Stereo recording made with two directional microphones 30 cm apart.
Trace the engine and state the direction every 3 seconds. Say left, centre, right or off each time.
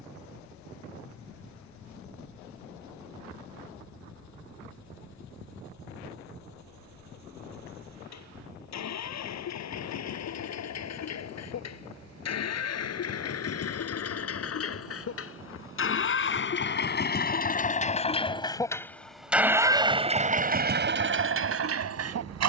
left, left, left, left, left, left, centre, right.